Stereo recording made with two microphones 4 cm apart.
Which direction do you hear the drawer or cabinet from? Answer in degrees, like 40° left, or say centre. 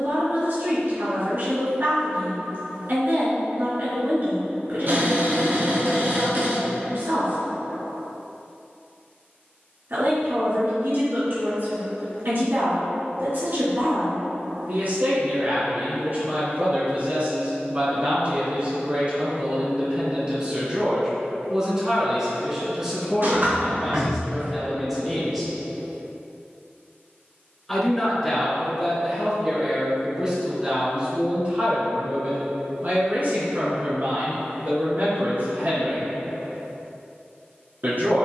60° right.